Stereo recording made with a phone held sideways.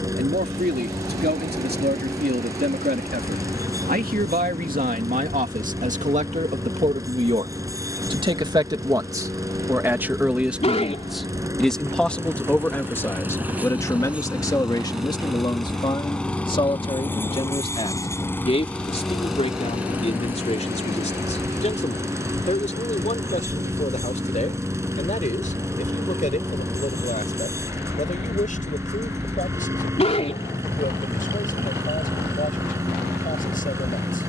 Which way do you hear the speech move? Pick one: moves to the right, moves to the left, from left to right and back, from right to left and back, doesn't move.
moves to the left.